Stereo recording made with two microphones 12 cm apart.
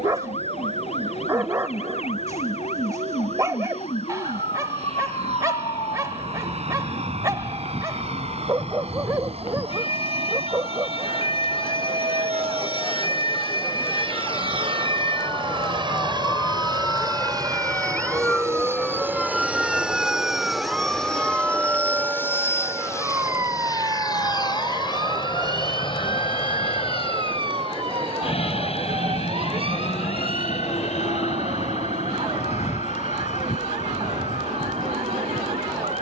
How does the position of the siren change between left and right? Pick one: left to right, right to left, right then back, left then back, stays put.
left to right.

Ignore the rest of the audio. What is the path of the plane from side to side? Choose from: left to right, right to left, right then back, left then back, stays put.
right to left.